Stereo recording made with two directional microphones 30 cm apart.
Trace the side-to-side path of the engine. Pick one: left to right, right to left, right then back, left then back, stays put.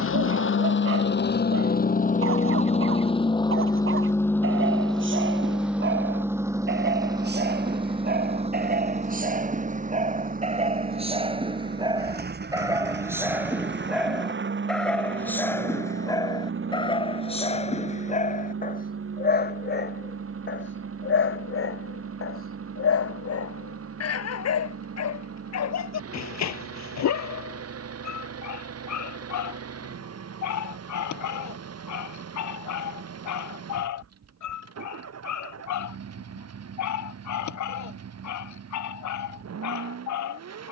left to right.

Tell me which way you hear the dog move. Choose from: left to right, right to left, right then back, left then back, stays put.
right to left.